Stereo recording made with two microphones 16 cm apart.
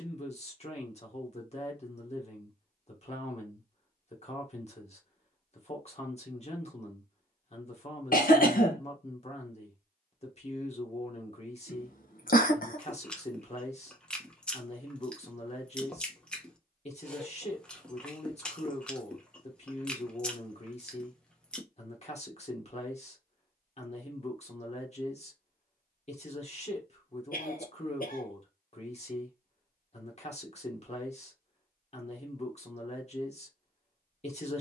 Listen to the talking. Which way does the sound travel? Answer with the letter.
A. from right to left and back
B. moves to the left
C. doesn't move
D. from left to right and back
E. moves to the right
C.